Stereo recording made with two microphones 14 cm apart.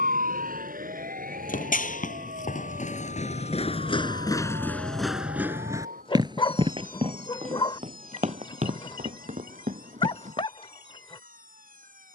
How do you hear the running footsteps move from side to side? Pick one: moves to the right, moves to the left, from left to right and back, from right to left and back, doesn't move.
moves to the right.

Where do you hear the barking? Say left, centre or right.
left.